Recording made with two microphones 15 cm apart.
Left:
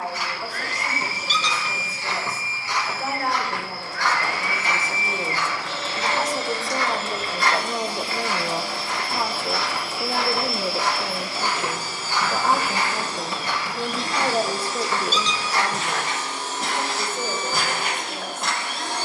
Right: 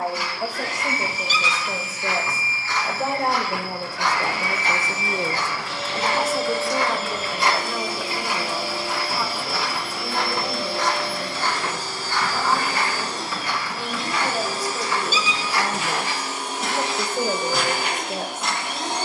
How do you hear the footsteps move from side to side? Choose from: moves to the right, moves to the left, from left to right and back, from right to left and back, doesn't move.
from left to right and back.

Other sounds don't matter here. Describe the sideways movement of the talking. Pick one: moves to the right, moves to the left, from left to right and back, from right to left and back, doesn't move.
from right to left and back.